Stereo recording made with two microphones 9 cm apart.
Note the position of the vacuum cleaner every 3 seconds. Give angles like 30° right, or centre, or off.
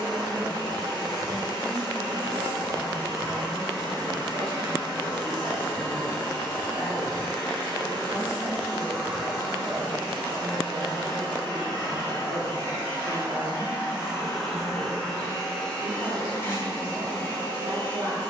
50° right, 50° right, 50° right, 50° right, 20° right, 20° left.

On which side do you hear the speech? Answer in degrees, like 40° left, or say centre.
50° right.